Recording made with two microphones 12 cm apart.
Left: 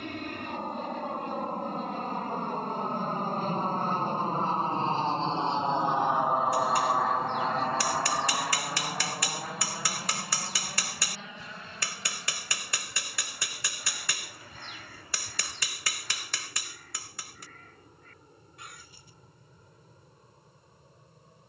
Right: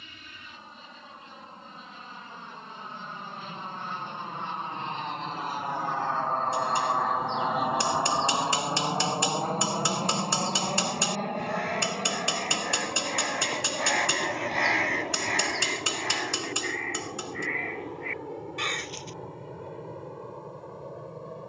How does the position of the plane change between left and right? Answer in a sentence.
In this clip you hear the plane move from left to right.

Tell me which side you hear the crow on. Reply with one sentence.
In this clip you hear the crow on the right.